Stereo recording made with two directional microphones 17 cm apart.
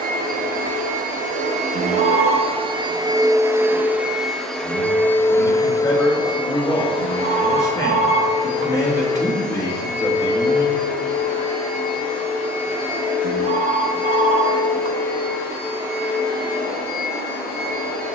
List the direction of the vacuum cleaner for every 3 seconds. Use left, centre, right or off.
right, centre, left, left, left, left.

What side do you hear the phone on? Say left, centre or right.
right.